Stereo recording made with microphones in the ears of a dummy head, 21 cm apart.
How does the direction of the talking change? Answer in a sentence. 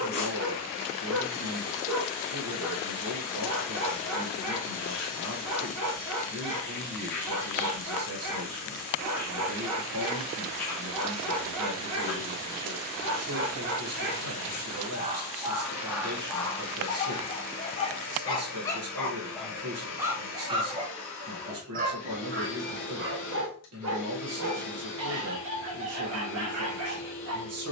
In this clip you hear the talking stay in one place.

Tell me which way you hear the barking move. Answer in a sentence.
In this clip you hear the barking go left and come back.